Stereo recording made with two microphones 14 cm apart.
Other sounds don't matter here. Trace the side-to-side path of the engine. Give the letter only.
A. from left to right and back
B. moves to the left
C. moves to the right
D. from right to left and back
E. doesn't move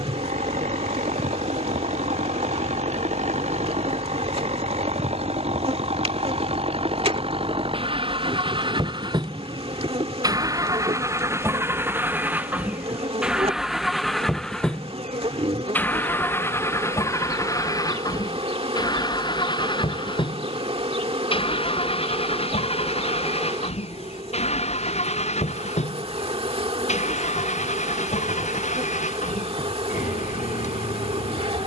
B.